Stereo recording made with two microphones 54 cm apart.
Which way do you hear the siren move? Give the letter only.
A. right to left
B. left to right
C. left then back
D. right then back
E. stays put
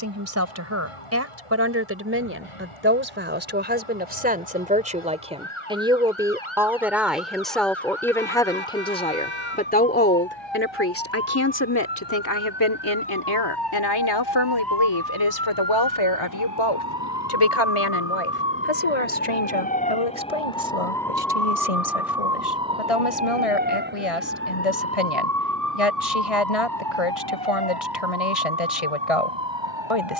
B.